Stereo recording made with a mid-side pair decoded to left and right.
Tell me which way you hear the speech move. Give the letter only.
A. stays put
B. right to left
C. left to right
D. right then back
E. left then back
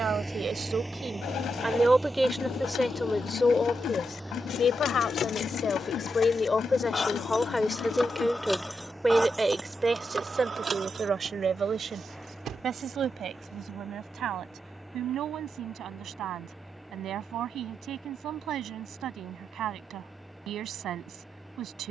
E.